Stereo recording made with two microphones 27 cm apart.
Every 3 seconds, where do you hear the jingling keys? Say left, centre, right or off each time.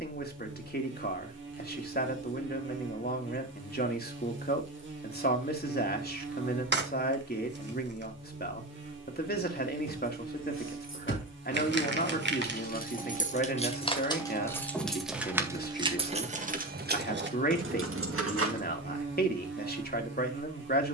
off, off, off, left, left, right, right.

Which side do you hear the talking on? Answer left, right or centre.
left.